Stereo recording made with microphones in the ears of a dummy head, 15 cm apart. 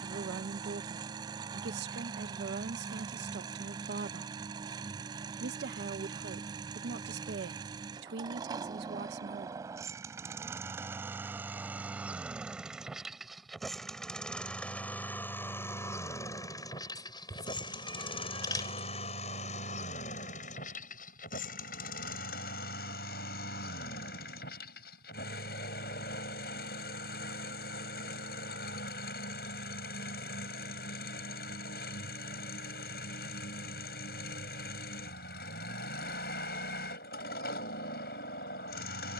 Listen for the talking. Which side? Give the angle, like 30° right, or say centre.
70° right.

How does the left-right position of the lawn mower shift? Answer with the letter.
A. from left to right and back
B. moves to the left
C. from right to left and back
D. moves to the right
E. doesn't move
B.